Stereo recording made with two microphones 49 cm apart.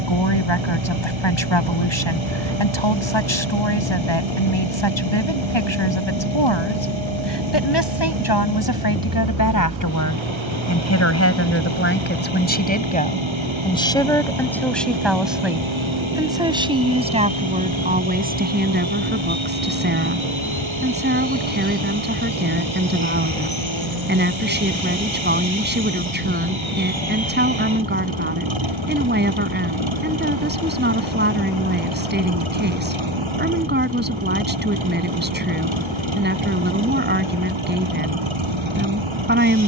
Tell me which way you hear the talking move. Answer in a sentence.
You can hear the talking travel towards the right.